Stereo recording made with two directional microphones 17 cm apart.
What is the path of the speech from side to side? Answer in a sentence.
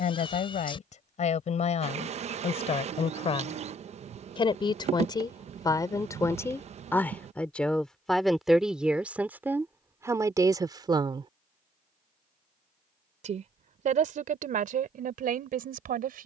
You can hear the speech move from left to right.